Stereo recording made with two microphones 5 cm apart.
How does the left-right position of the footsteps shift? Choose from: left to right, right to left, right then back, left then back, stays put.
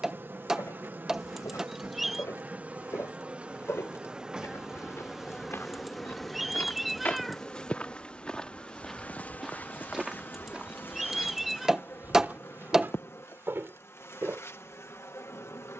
left to right.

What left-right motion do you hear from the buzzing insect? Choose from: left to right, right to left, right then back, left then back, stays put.
right to left.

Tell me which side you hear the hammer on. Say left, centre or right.
centre.